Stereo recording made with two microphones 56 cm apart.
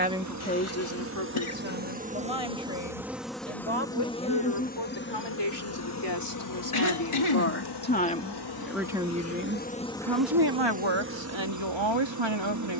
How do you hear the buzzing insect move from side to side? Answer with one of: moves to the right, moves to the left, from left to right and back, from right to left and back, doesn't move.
from right to left and back.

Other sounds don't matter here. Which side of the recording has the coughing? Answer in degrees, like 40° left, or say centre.
60° left.